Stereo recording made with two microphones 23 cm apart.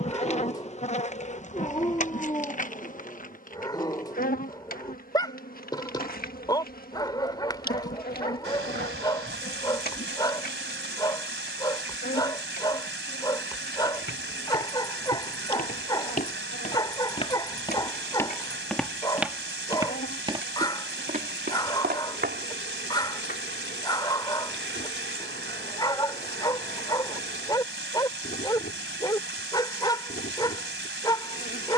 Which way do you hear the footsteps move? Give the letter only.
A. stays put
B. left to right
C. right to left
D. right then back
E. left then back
B.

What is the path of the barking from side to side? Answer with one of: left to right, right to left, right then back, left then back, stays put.
stays put.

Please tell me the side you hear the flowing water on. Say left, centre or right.
right.